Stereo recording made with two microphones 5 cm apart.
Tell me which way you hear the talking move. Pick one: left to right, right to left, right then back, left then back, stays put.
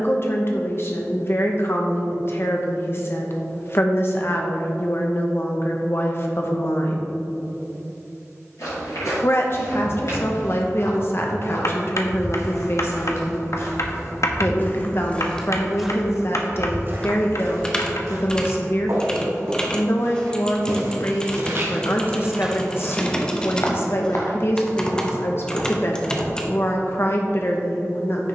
stays put.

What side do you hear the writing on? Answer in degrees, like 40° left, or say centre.
60° left.